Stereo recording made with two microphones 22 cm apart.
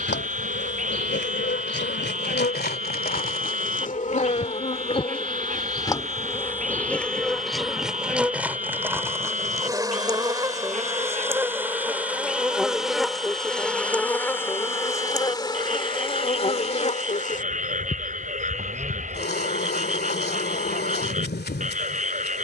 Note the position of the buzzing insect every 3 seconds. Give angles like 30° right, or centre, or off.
50° left, 30° left, centre, 10° right, centre, 30° left, 50° left, 50° left.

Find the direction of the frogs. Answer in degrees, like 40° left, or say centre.
40° right.